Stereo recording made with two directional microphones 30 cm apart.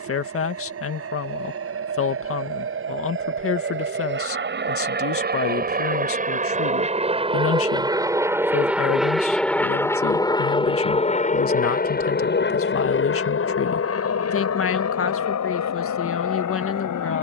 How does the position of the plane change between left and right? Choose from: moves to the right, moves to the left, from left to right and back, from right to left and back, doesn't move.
moves to the left.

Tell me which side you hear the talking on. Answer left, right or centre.
left.